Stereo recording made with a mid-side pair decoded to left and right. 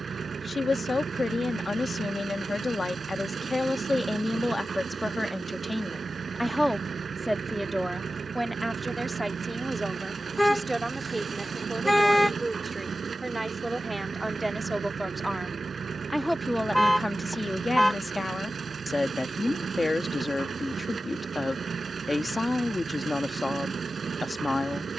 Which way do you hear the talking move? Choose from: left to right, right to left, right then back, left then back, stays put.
right then back.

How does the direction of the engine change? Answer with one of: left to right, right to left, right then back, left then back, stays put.
stays put.